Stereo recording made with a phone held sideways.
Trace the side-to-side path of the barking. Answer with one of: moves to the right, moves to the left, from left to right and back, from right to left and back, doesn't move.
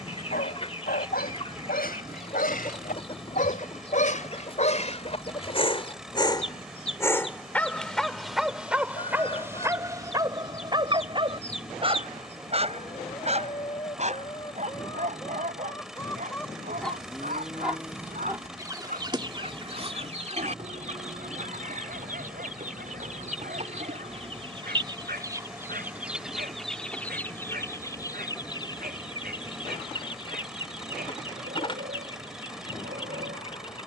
moves to the right.